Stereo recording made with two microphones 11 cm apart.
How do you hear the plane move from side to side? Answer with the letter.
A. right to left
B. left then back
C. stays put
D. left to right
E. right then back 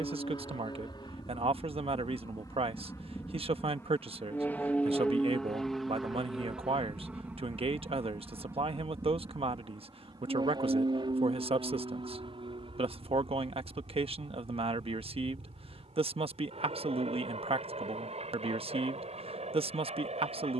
D.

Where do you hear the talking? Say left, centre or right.
right.